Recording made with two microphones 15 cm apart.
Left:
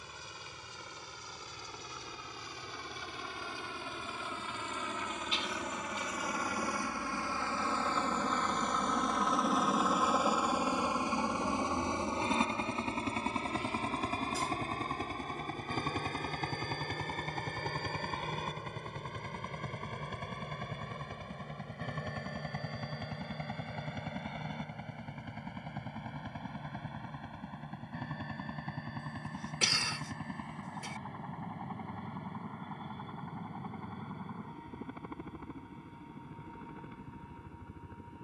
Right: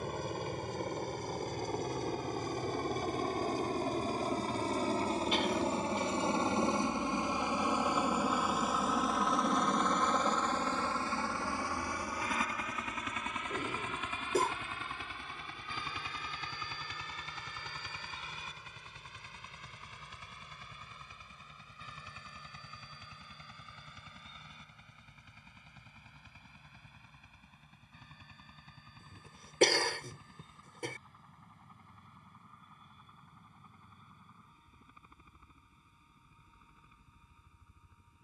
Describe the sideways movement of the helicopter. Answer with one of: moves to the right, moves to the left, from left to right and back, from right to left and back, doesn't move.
moves to the left.